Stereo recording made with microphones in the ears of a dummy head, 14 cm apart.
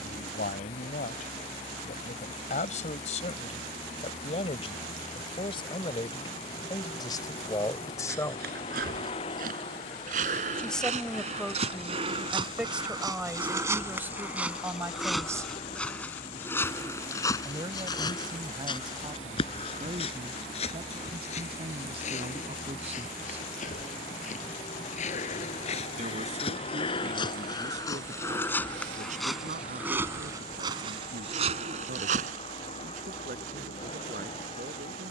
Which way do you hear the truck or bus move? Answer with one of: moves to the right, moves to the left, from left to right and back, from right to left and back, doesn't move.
doesn't move.